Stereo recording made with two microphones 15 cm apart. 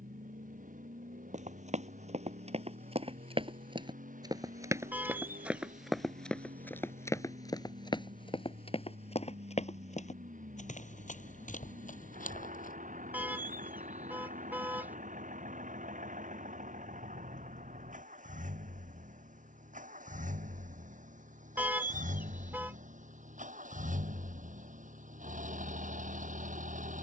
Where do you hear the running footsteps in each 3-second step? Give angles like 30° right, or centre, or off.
50° right, 20° right, 20° left, 50° left, 60° left, off, off, off, off.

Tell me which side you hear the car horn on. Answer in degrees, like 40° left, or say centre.
10° right.